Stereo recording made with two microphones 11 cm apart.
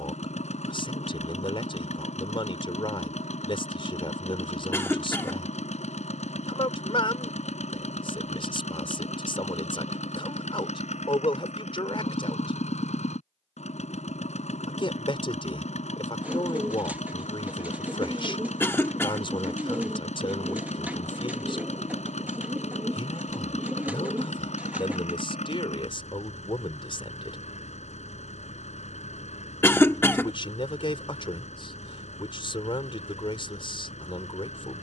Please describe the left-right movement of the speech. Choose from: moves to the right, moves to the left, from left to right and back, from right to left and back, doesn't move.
doesn't move.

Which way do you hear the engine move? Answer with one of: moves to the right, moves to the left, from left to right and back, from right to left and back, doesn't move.
doesn't move.